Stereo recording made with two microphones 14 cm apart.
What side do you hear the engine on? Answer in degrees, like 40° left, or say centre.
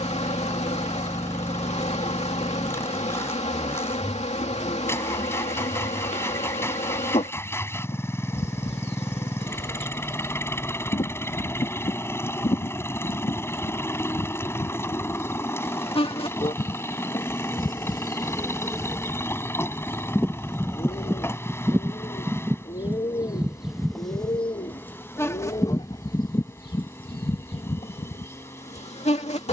20° left.